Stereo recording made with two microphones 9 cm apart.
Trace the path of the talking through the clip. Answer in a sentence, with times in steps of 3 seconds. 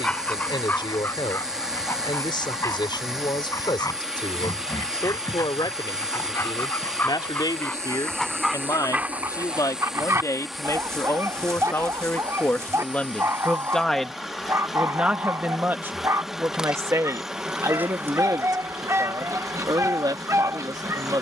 In this clip you hear the talking on the left from 0 s, in the centre from 12 s and on the right from 15 s.